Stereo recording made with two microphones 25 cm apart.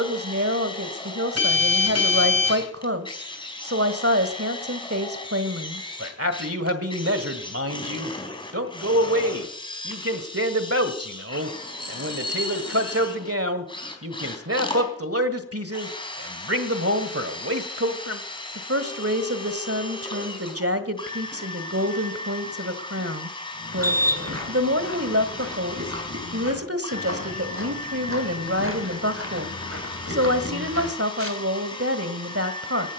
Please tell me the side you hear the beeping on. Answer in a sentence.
You can hear the beeping on the right.